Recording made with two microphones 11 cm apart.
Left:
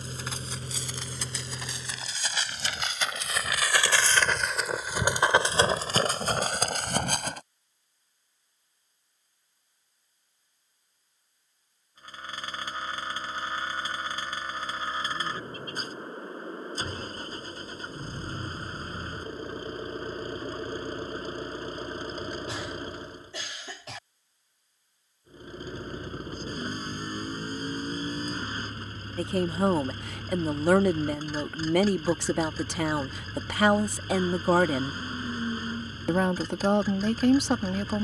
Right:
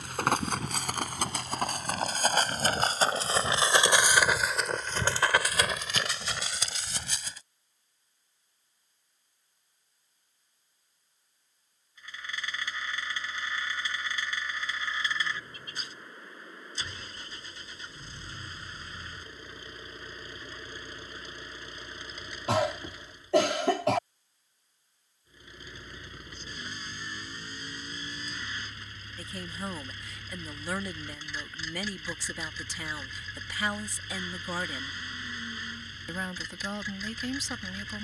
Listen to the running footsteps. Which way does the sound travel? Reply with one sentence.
You can hear the running footsteps travel towards the left.